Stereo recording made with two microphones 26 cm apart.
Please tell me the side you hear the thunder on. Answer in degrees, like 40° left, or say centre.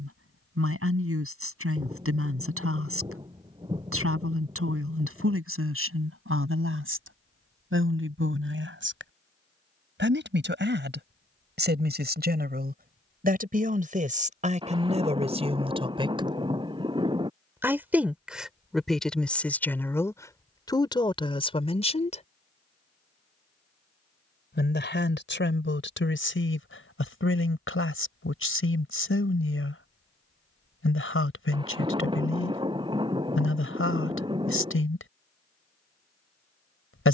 20° right.